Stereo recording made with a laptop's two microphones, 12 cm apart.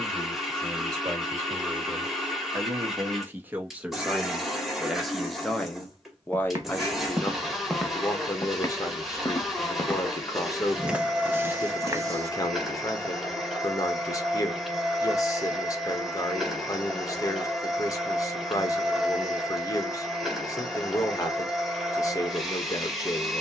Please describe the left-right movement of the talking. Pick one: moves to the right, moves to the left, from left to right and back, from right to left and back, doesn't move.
moves to the left.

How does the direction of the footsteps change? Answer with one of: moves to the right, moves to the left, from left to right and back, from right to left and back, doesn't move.
from right to left and back.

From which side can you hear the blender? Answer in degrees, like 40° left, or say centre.
centre.